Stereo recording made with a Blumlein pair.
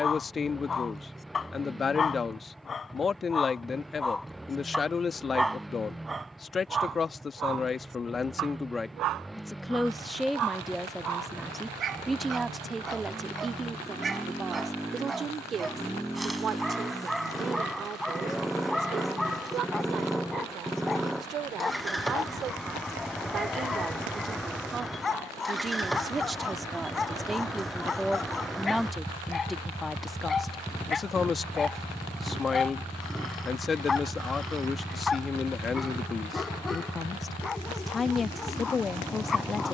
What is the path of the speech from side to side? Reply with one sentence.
In this clip you hear the speech go right and come back.